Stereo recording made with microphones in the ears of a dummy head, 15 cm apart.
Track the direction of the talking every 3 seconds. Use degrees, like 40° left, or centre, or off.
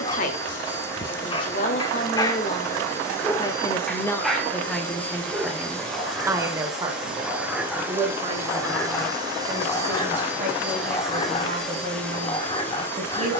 40° left, 10° left, 30° right, 40° right, 40° right.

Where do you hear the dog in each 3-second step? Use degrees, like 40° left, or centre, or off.
30° left, centre, centre, 20° left, 30° left.